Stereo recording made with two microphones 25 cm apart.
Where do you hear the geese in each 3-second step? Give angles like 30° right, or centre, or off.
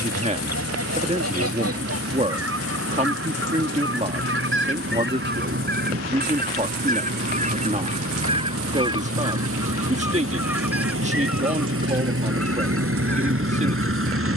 70° right, 50° right, 30° right, 10° right, 10° left.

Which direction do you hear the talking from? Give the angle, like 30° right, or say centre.
30° right.